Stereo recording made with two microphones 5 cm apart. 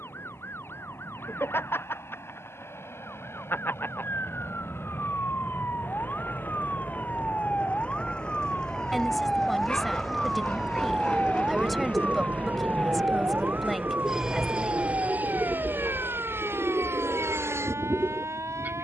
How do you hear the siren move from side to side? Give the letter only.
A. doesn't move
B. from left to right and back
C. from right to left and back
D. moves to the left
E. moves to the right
E.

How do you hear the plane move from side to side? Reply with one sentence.
In this clip you hear the plane move to the right.